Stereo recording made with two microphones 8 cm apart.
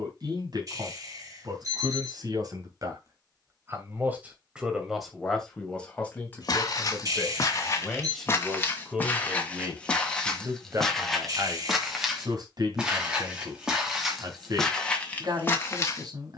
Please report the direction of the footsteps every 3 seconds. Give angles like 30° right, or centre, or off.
off, off, 40° left, 10° left, centre, 30° left.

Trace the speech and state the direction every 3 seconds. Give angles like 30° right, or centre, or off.
60° right, 10° right, 10° left, 30° right, 60° right, 60° right.